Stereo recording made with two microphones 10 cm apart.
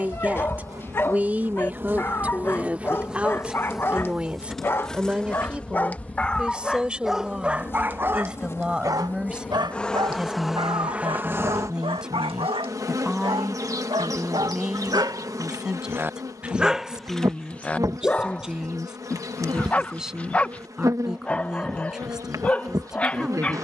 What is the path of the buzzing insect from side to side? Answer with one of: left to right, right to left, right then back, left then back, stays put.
left then back.